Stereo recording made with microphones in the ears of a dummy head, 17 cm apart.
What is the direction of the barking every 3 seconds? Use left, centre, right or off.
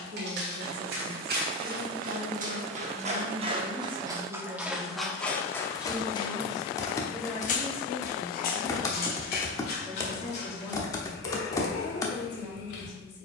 right, centre, left, left, left.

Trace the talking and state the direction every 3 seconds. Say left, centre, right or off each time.
right, right, centre, left, left.